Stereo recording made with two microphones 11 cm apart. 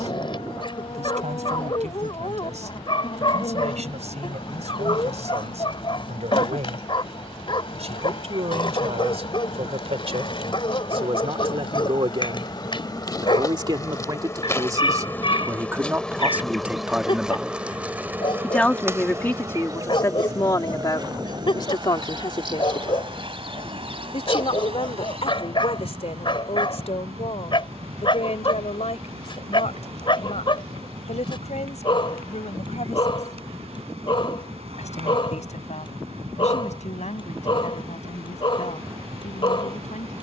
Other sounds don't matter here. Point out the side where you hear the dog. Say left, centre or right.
left.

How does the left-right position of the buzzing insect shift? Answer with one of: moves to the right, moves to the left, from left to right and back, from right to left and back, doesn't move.
moves to the right.